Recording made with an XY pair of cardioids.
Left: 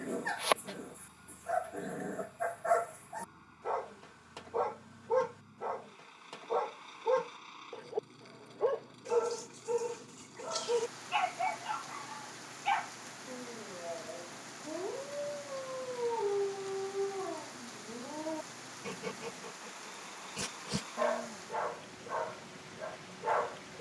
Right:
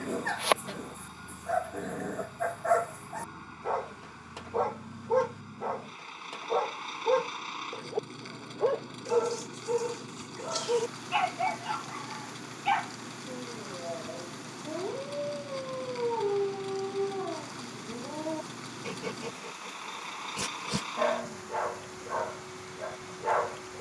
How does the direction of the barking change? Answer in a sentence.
You can hear the barking stay in one place.